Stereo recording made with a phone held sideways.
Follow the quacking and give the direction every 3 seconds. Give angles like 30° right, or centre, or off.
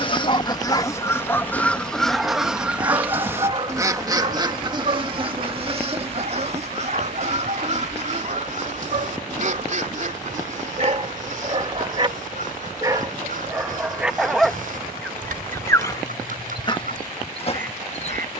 10° left, 30° right, 50° right, 60° right, 60° right, 70° right.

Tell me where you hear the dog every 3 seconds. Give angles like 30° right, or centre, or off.
10° left, 40° right, 60° right, 40° right, 10° right, 30° left.